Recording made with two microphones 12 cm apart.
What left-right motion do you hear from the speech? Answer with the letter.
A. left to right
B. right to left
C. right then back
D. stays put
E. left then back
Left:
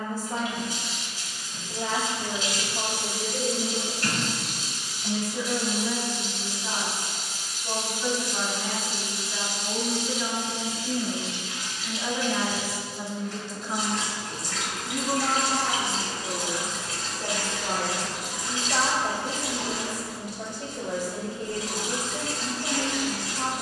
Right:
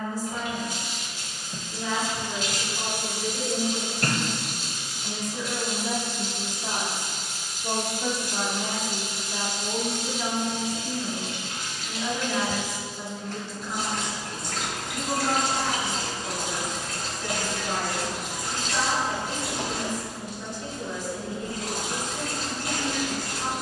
C.